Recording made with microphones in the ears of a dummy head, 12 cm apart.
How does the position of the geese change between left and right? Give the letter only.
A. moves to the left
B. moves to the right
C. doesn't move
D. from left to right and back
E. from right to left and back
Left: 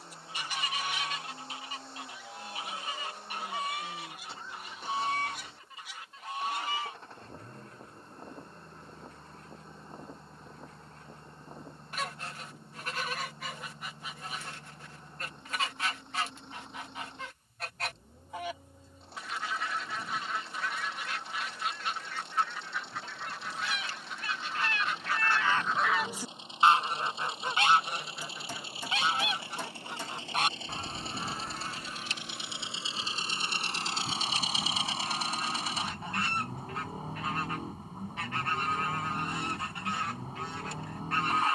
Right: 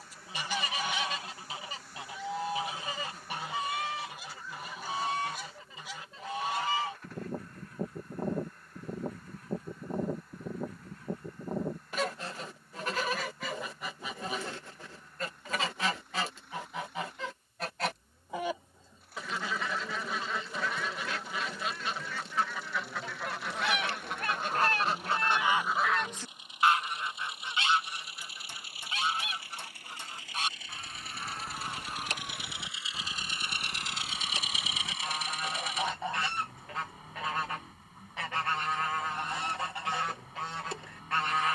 E.